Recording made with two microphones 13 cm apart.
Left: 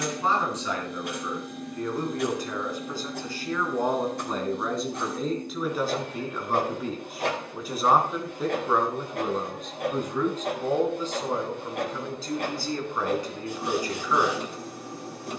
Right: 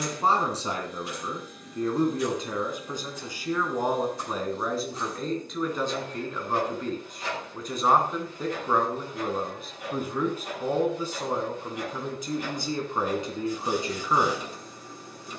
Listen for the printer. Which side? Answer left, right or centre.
left.